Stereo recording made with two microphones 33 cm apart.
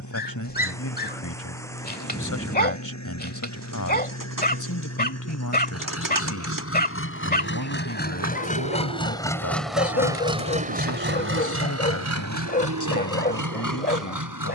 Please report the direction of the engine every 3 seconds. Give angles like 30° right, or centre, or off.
60° left, 50° left, 30° left, 20° right, 70° right.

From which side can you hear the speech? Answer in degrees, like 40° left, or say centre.
60° left.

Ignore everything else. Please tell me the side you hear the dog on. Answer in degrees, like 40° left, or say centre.
30° left.